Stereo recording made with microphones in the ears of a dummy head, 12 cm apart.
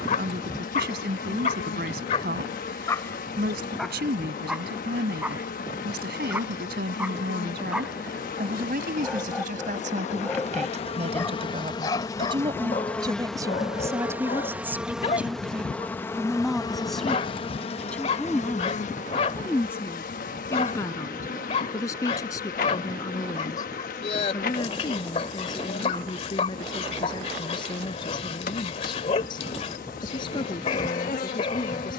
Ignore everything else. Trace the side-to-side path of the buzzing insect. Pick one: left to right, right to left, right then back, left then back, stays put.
right then back.